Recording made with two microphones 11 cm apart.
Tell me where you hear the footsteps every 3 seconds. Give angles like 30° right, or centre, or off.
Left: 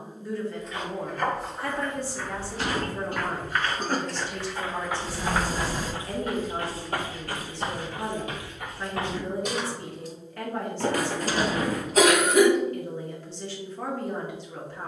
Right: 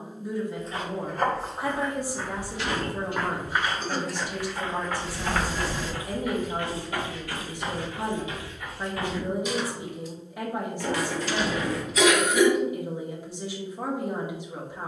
30° right, centre, 50° left, 70° left, off.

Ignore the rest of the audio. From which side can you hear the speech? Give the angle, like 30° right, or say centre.
10° right.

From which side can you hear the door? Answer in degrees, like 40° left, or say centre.
40° left.